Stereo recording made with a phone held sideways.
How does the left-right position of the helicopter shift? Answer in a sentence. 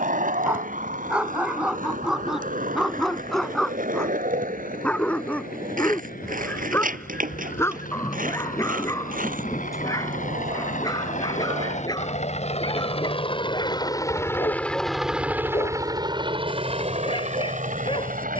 You can hear the helicopter travel towards the right.